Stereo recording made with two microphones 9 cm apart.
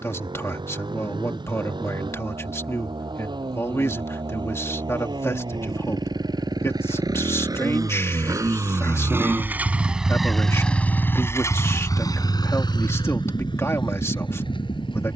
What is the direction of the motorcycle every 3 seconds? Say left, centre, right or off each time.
right, right, right, centre, left.